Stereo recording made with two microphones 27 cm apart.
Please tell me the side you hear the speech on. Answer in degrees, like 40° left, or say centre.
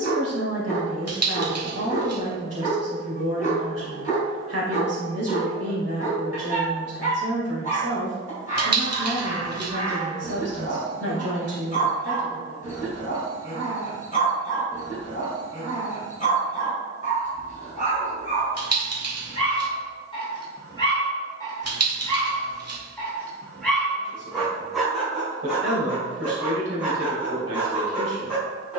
60° right.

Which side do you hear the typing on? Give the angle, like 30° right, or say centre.
60° right.